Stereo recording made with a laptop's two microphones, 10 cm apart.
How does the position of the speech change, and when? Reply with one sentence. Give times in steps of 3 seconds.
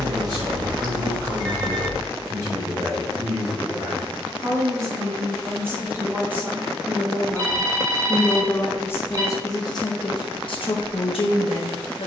You can hear the speech on the right from 0 s, in the centre from 6 s and on the left from 9 s.